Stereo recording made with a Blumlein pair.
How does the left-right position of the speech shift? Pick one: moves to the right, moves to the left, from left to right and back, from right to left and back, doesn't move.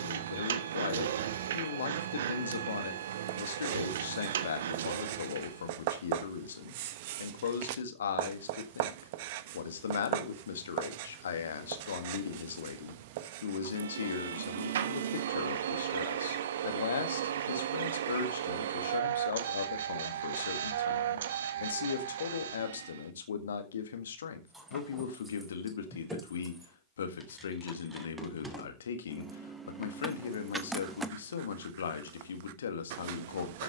doesn't move.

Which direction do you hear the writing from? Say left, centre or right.
right.